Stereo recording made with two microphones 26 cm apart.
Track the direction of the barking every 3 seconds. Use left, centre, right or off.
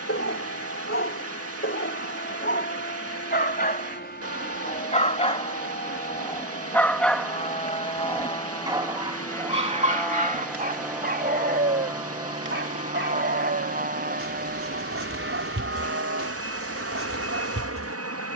left, left, centre, right, right, right.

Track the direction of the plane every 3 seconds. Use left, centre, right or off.
left, left, left, centre, right, right.